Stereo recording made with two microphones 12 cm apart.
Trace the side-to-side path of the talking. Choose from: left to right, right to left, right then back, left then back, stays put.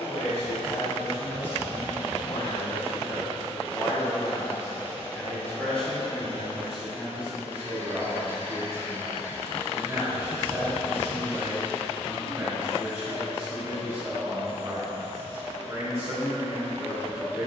left to right.